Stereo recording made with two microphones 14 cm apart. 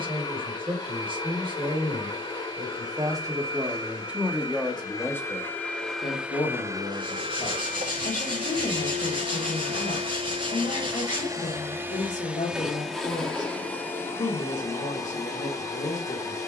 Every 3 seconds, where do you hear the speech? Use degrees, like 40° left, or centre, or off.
40° right, 10° right, 50° left, 60° left, 60° left, 60° left.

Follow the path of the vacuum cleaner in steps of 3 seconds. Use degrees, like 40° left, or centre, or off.
30° left, 20° left, 40° right, 40° right, 10° left, 20° left.